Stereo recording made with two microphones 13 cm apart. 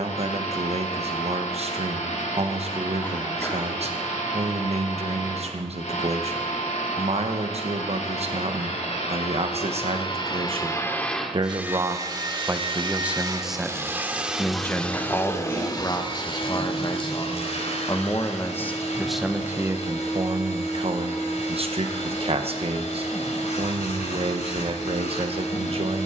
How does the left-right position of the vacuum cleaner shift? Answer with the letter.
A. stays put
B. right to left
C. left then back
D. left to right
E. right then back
E.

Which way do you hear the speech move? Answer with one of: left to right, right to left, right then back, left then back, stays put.
left then back.